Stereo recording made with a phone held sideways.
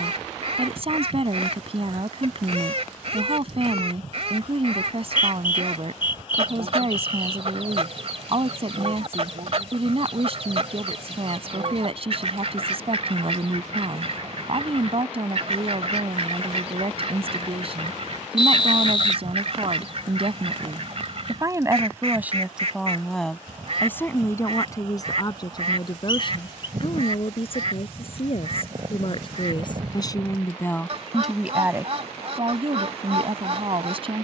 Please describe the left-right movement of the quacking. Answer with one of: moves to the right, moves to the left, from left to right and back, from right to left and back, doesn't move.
doesn't move.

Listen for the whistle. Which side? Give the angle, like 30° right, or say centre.
40° left.